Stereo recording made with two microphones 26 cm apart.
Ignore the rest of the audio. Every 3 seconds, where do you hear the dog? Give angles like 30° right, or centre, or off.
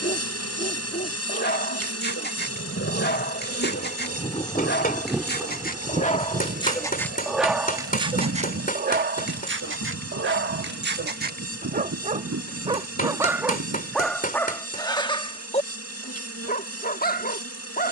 40° left, 40° left, centre, 40° right, centre, 30° left.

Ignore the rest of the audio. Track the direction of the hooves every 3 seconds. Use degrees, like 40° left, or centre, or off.
50° left, 10° left, 50° right, 70° right, 70° right, off.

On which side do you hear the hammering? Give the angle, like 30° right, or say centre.
30° left.